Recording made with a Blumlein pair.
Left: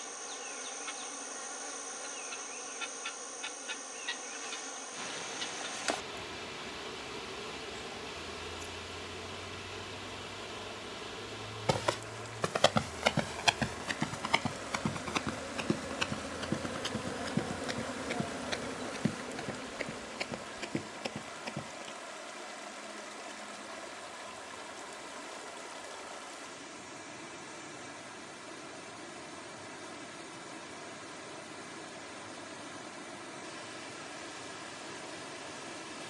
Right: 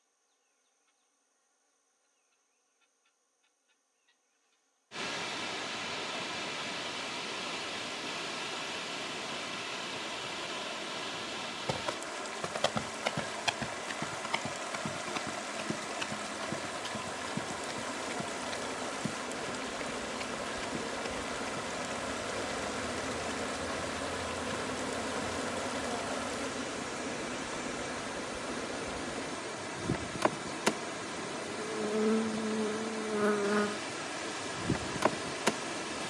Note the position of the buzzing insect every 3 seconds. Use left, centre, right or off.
left, left, left, left, left, left, centre, right, right, right, right, right.